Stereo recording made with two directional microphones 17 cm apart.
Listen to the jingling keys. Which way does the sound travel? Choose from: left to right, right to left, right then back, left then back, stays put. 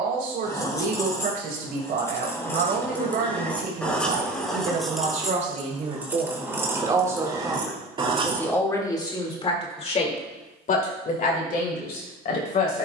left to right.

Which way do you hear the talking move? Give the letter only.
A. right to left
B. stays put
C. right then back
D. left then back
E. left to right
A.